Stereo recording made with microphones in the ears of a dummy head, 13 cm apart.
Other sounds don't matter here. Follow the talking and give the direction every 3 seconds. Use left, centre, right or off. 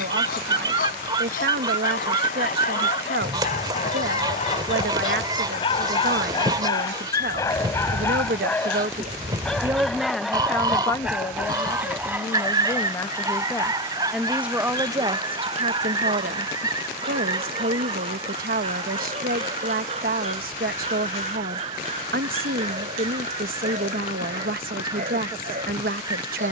right, right, right, centre, centre, right, right, right, right.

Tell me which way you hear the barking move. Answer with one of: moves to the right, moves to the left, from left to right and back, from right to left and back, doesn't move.
moves to the right.